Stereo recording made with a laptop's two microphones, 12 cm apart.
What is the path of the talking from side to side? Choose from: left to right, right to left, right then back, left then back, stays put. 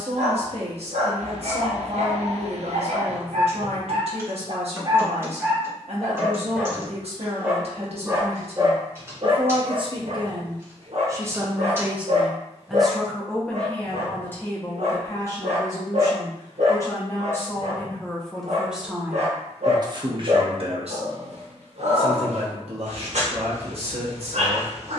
left then back.